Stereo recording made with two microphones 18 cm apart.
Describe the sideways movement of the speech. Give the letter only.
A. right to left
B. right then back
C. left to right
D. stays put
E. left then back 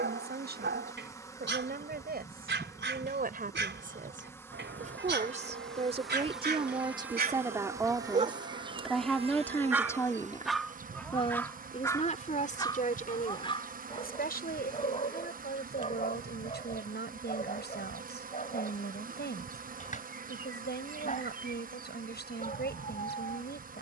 A.